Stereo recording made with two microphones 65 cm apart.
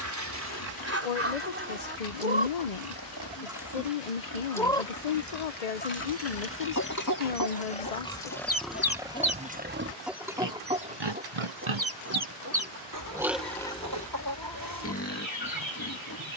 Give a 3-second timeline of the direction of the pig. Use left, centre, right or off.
left, left, centre, right, centre, left.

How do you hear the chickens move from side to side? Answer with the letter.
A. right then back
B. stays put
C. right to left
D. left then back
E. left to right
D.